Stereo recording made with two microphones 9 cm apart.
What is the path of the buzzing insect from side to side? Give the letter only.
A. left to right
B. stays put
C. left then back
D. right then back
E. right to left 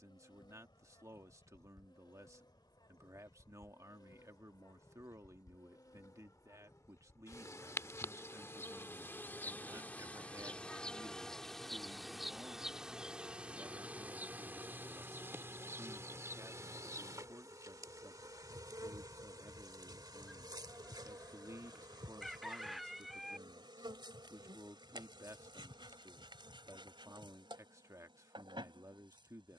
A.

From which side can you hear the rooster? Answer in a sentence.
You can hear the rooster in the centre.